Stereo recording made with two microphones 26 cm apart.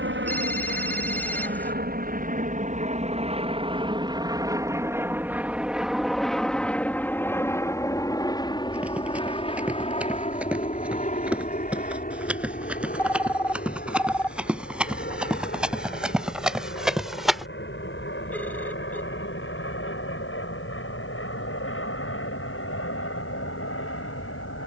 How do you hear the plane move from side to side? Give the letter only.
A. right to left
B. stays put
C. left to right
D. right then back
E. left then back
A.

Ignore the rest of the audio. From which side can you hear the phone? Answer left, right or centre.
centre.